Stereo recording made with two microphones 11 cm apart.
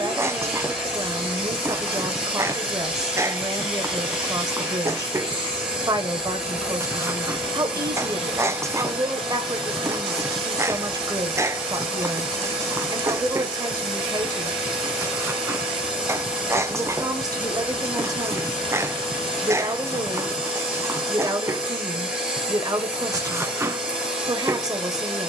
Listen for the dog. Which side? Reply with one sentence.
In this clip you hear the dog on the right.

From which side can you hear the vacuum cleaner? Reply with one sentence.
You can hear the vacuum cleaner in the centre.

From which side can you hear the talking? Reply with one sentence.
In this clip you hear the talking on the right.